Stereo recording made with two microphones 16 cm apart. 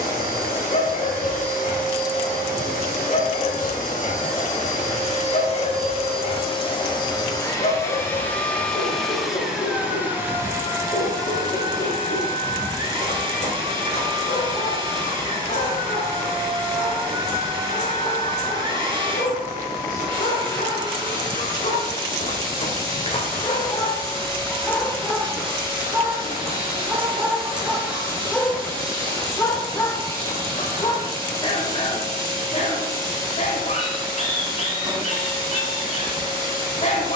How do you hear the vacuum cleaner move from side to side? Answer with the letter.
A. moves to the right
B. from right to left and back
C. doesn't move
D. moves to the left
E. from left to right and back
A.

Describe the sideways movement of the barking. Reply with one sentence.
You can hear the barking move from left to right and back again.